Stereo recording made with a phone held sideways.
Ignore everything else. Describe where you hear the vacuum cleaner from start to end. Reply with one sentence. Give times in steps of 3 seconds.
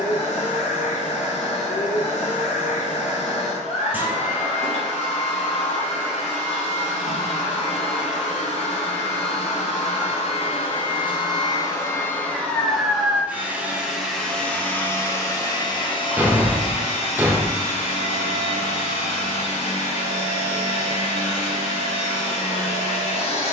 You can hear the vacuum cleaner on the left from 0 s, in the centre from 12 s and on the left from 15 s.